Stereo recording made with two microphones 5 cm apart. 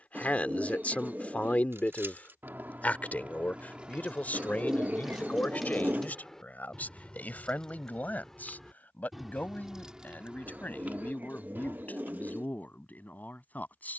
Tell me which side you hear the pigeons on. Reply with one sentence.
In this clip you hear the pigeons on the right.